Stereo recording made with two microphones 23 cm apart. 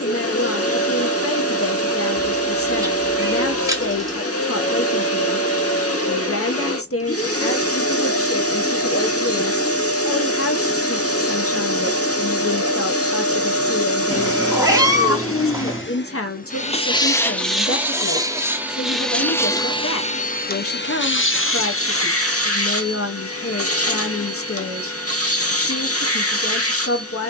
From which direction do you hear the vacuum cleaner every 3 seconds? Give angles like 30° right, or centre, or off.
80° left, 80° left, 80° left, 80° left, 80° left, 30° left, 10° left, 70° left, 80° left.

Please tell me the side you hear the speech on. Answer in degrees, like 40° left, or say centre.
70° left.